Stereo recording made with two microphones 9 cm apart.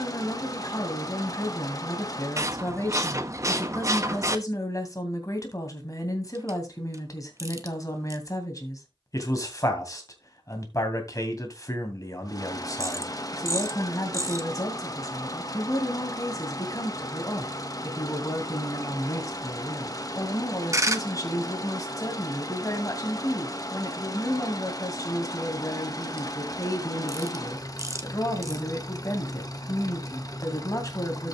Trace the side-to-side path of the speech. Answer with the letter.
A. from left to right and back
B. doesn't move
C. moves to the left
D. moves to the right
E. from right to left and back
B.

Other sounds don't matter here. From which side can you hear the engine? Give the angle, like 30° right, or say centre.
40° left.